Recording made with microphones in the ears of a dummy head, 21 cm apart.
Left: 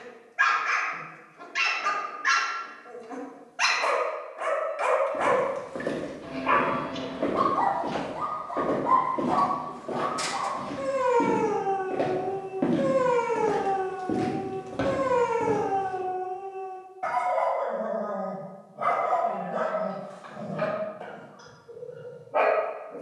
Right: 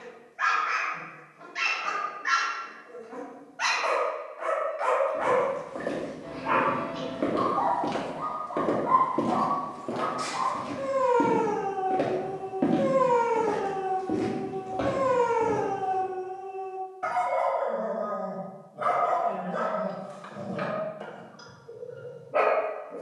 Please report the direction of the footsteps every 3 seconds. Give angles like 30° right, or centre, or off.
off, 30° left, 20° right, 20° right, 10° left, 30° left, off, off.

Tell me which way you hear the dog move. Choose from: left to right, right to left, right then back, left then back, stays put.
left to right.